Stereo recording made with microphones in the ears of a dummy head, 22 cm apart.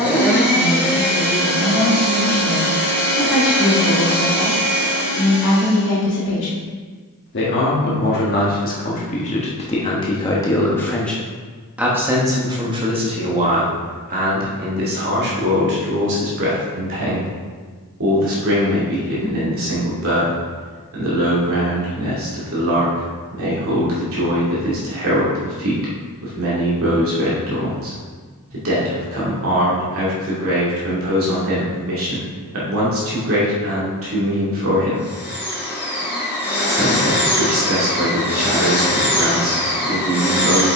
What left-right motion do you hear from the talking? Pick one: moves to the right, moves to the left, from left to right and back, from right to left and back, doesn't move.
moves to the right.